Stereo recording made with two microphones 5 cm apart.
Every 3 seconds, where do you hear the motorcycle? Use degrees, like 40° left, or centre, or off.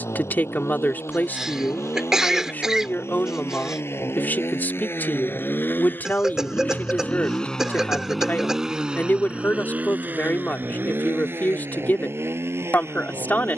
70° left, 50° left, 10° left, 40° right, 60° right.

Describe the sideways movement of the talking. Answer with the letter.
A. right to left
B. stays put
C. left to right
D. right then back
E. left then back
B.